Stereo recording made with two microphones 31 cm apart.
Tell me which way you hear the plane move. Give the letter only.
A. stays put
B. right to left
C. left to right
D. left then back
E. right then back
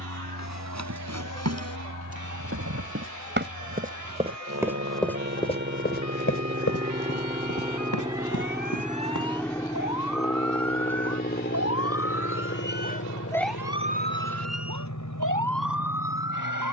B.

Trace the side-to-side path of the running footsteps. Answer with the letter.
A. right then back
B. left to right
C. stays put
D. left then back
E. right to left
E.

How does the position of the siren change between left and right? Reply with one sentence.
In this clip you hear the siren go from the left side to the right.